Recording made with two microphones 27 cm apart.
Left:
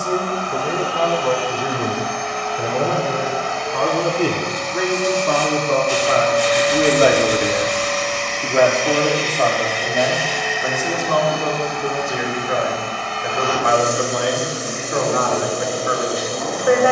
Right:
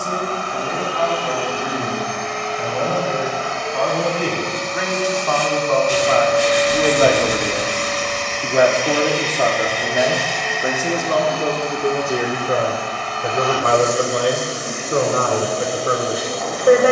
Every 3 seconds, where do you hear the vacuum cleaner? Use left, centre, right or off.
right, right, centre, centre, left, left.